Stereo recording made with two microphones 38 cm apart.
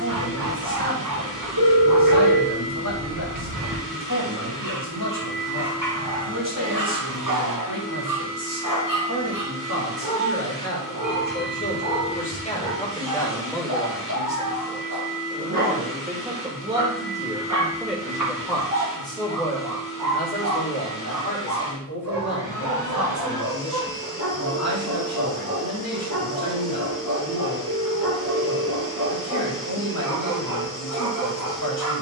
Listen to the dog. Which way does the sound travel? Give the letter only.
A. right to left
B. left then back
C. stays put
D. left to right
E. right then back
C.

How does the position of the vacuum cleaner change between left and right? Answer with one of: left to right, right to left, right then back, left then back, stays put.
stays put.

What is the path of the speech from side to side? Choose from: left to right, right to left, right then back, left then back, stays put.
right then back.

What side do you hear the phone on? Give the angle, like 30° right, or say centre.
80° right.